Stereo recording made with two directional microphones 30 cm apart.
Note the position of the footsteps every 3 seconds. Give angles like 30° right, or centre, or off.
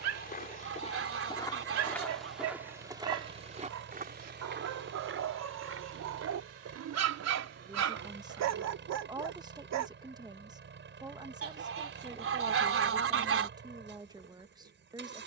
10° left, 40° right, 60° right, off, off.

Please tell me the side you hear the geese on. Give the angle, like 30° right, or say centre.
50° right.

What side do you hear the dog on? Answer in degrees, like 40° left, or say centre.
70° right.